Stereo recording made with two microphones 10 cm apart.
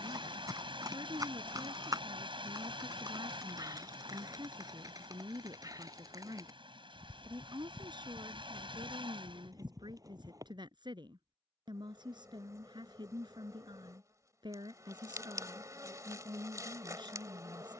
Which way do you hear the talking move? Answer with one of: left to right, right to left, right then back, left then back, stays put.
stays put.